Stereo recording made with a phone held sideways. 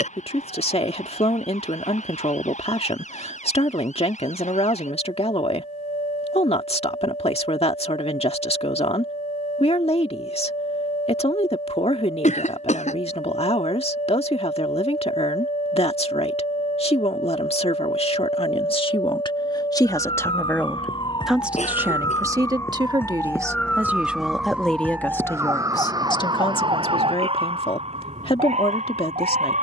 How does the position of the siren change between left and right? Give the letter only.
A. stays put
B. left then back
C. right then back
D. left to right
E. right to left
D.